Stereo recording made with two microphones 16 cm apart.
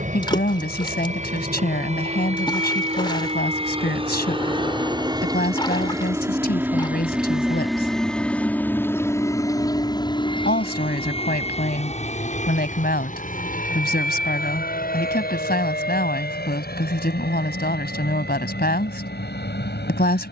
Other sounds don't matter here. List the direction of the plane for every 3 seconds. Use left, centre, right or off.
right, right, centre, left, left, left, left.